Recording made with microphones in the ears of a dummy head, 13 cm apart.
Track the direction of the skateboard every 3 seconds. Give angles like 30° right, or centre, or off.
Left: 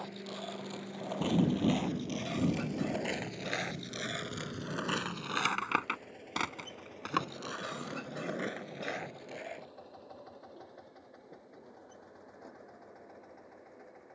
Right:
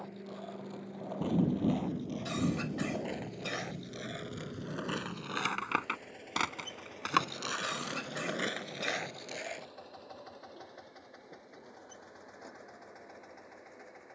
60° left, 30° left, 50° right, 70° right, off.